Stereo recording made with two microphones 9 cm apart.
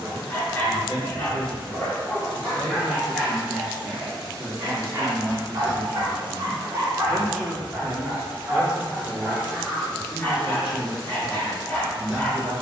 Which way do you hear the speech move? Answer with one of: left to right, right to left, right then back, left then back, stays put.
left to right.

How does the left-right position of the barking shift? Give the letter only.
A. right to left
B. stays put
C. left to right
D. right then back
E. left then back
D.